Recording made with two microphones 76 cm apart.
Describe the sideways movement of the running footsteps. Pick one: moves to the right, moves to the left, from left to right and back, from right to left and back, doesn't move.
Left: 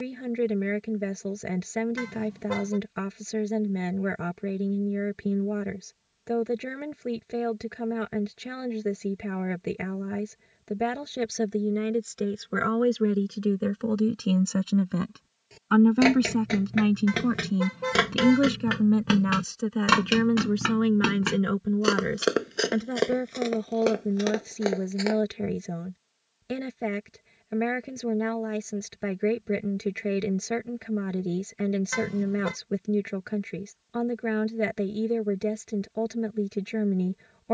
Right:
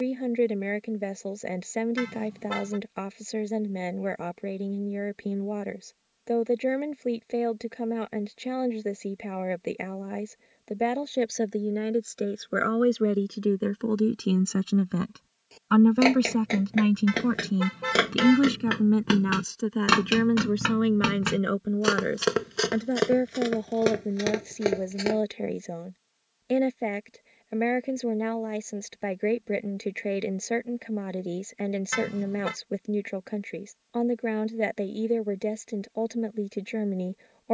moves to the right.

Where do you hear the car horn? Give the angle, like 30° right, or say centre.
centre.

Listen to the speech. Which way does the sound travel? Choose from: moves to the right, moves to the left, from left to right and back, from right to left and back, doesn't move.
from left to right and back.